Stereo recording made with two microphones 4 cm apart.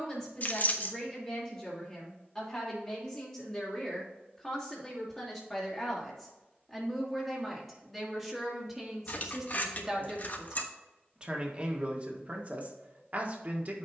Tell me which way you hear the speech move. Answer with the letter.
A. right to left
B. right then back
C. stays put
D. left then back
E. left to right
E.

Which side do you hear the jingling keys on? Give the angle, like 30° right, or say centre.
40° left.